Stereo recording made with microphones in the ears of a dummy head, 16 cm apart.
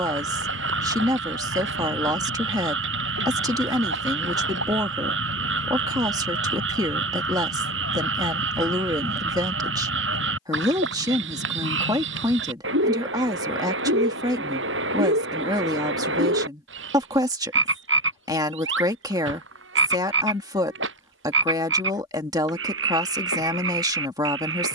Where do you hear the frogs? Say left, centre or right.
right.